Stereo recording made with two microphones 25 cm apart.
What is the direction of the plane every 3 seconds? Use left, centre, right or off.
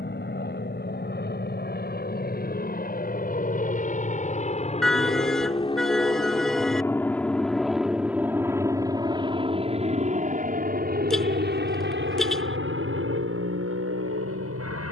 left, left, centre, right, right.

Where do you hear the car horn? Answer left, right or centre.
centre.